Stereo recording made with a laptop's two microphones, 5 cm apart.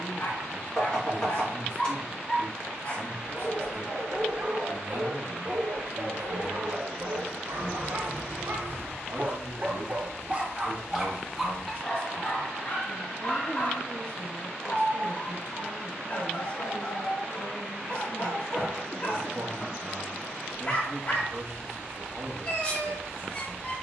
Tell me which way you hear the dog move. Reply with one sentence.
You can hear the dog move from left to right and back again.